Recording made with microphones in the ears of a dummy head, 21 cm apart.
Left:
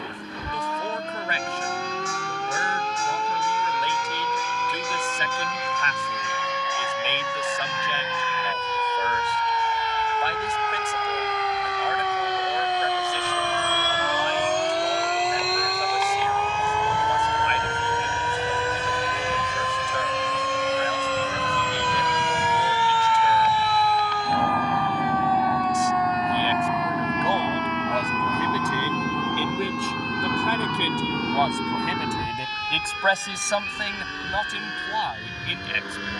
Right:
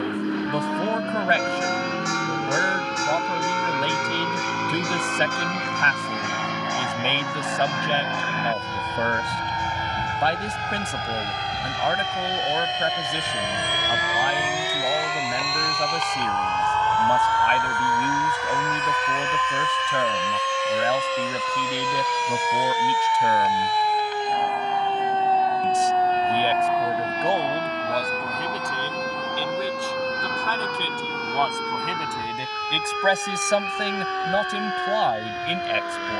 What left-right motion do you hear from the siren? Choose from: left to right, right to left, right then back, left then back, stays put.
left to right.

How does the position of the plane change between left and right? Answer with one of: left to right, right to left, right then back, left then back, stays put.
right to left.